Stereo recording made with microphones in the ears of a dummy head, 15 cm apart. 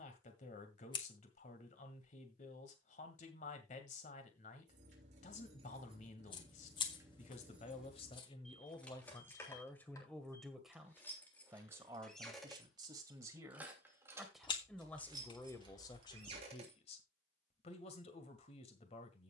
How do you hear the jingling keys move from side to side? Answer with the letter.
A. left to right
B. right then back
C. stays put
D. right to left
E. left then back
E.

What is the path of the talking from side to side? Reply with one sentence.
In this clip you hear the talking go right and come back.